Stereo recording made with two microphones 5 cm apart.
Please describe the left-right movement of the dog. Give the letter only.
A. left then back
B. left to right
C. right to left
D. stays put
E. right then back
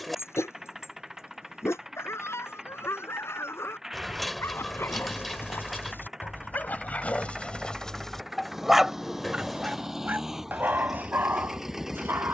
B.